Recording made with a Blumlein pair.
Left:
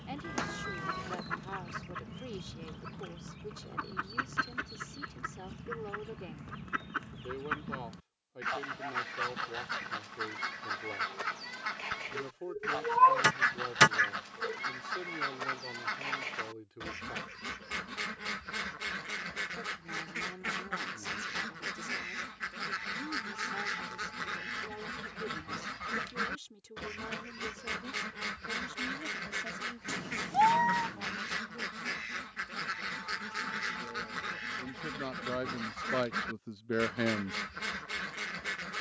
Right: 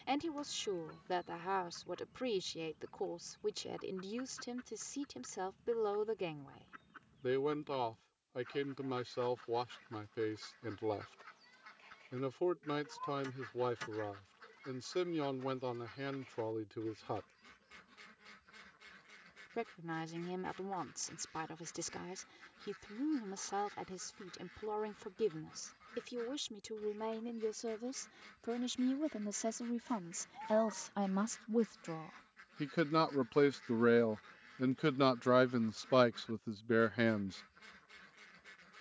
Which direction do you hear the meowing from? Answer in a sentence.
In this clip you hear the meowing on the left.